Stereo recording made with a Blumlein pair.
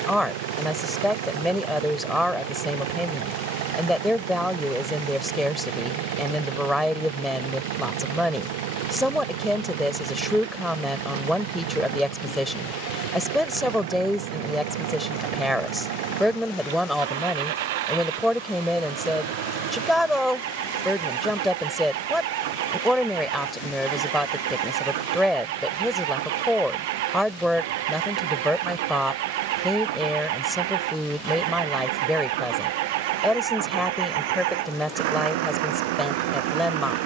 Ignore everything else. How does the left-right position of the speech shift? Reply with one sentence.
You can hear the speech stay in one place.